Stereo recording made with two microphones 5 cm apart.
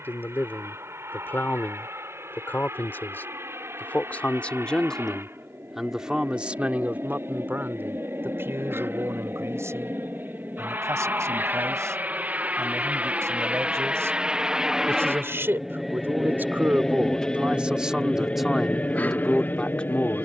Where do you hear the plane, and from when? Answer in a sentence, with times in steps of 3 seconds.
In this clip you hear the plane on the right from 0 s, in the centre from 15 s and on the left from 18 s.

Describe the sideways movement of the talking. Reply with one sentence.
You can hear the talking move from left to right and back again.